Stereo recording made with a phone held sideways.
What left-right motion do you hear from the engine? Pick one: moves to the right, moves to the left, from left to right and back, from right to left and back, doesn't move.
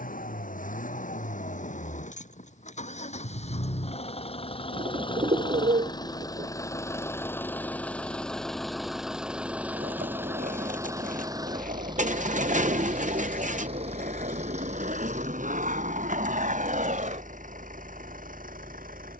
moves to the right.